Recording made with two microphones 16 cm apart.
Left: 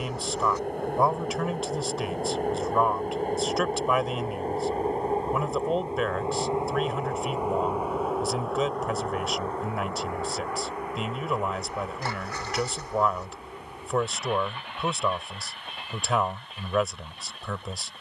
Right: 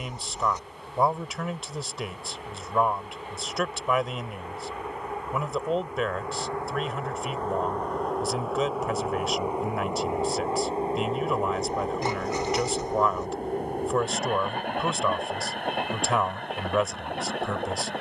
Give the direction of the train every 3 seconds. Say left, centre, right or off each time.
left, left, centre, right, right, right.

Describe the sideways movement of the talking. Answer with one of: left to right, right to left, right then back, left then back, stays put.
stays put.